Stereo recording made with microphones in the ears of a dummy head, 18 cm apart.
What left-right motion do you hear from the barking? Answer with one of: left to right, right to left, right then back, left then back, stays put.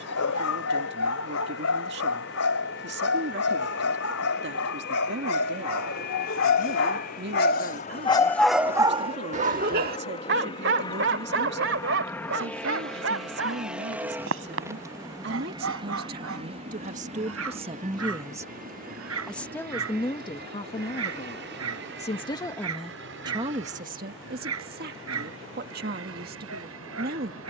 left to right.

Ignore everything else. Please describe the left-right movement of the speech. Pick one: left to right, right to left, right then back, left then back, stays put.
left then back.